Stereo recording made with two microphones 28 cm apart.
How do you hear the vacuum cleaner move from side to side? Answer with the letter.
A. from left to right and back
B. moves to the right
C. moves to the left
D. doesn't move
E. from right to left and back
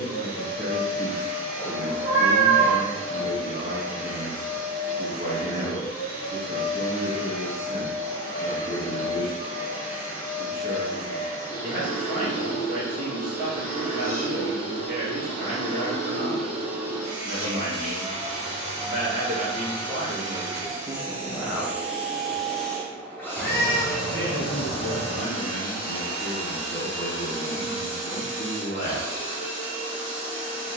A.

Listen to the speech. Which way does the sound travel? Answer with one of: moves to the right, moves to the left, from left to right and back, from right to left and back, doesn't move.
moves to the left.